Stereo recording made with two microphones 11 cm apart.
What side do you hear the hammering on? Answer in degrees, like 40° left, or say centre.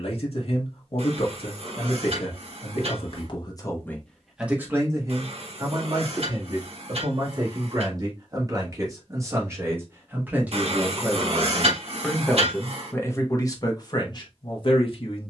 70° right.